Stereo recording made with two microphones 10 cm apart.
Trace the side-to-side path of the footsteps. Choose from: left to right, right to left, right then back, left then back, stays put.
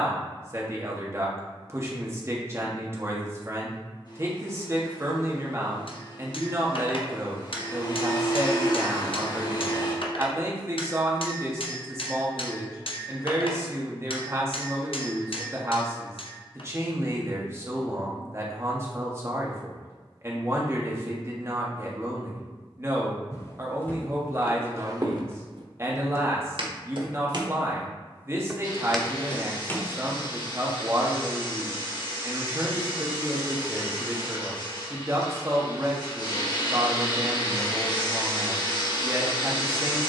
right then back.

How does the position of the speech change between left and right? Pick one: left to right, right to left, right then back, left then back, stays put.
stays put.